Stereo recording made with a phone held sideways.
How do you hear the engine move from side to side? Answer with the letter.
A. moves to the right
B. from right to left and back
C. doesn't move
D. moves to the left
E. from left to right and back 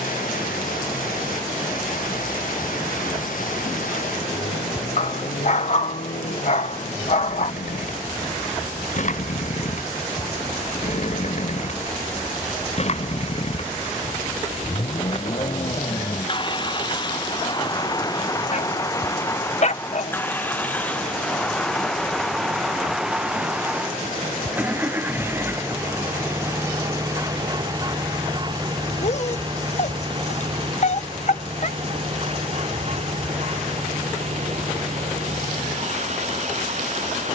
A.